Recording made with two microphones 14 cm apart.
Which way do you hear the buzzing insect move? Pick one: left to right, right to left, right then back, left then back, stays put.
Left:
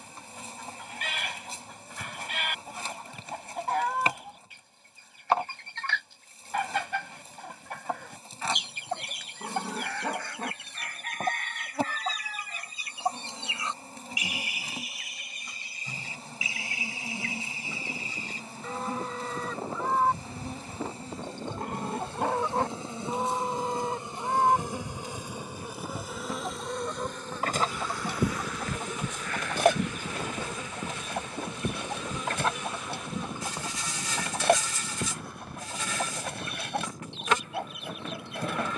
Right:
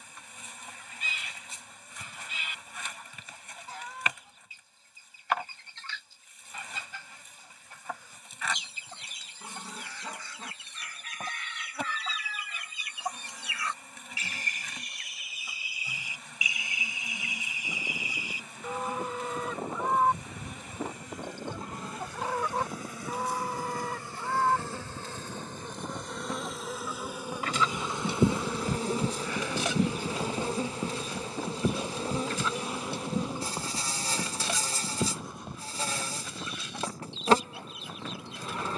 left to right.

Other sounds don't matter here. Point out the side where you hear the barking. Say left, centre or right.
left.